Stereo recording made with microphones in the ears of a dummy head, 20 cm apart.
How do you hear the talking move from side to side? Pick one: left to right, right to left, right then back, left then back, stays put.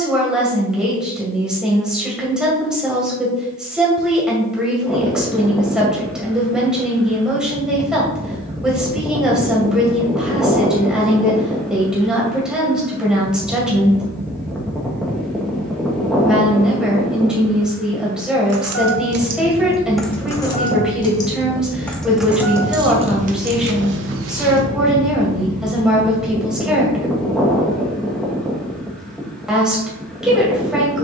stays put.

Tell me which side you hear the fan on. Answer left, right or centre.
centre.